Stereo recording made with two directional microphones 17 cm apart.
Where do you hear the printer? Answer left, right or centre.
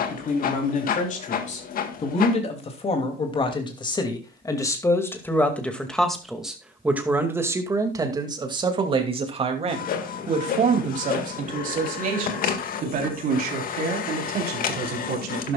left.